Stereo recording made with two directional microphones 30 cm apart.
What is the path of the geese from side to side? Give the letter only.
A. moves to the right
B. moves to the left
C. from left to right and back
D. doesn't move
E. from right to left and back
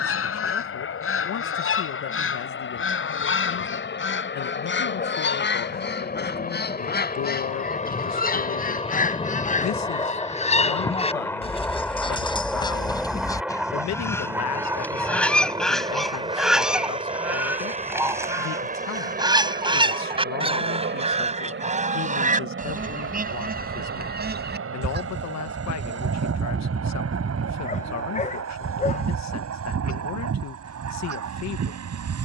A.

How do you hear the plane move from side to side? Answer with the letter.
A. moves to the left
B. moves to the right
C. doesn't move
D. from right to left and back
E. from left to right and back
B.